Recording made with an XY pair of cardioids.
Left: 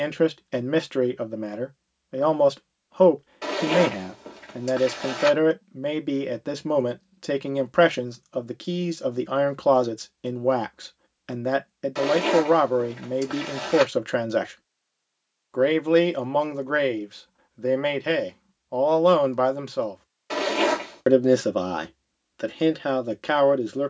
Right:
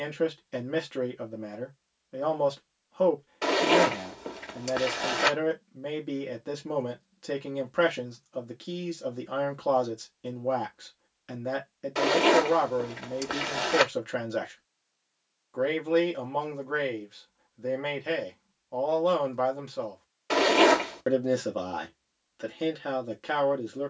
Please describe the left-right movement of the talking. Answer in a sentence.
You can hear the talking stay put.